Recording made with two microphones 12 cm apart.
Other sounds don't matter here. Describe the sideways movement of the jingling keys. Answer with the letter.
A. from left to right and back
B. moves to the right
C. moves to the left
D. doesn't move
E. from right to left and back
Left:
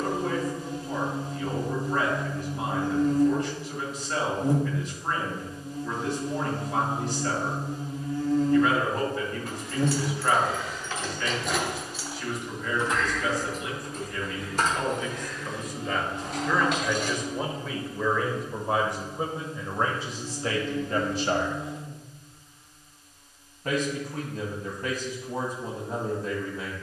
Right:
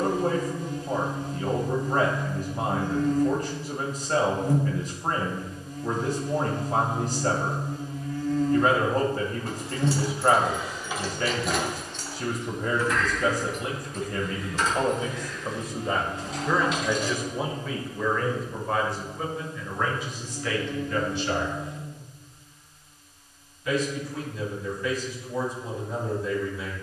C.